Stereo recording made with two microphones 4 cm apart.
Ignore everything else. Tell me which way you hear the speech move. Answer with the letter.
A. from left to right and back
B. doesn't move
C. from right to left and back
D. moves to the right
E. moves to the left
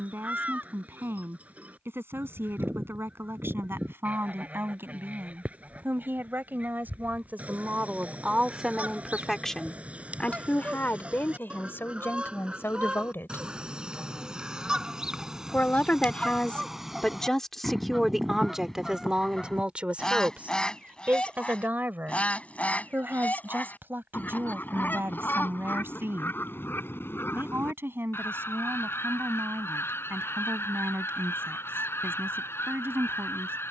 C.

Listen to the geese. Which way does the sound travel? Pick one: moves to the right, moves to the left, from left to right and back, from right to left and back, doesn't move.
moves to the left.